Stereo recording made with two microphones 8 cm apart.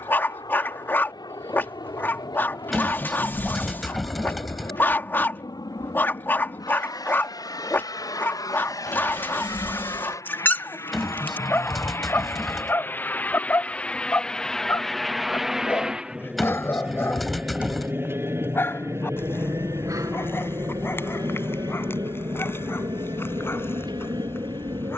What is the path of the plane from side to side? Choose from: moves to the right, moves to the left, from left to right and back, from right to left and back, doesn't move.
moves to the right.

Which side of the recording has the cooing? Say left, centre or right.
centre.